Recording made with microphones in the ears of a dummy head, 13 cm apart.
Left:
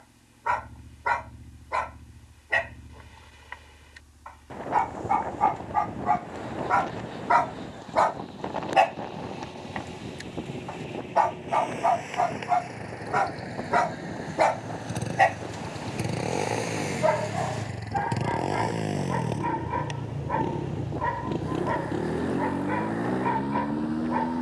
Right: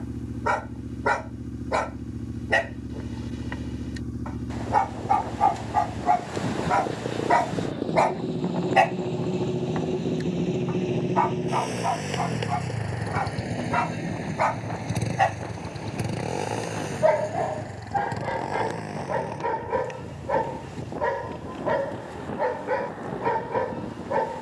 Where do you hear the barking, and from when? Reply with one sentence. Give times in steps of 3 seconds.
In this clip you hear the barking on the right from 0 s, on the left from 9 s and on the right from 15 s.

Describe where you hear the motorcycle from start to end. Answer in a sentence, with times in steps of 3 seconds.
In this clip you hear the motorcycle on the right from 0 s, in the centre from 15 s and on the left from 18 s.